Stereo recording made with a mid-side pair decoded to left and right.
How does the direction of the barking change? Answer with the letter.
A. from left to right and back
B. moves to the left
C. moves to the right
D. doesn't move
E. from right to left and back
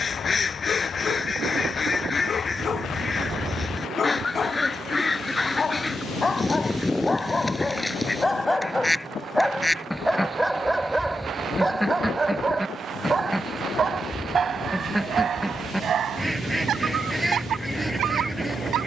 C.